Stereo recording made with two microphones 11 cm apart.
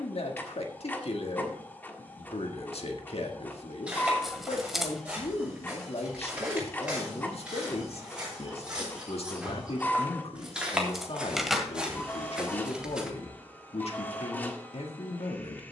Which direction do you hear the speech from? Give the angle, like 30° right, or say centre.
60° left.